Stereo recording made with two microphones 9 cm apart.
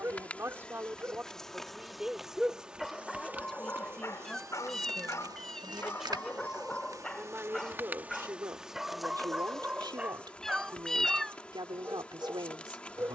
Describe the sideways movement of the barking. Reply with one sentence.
In this clip you hear the barking go left and come back.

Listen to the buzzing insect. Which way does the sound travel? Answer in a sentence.
You can hear the buzzing insect move from left to right and back again.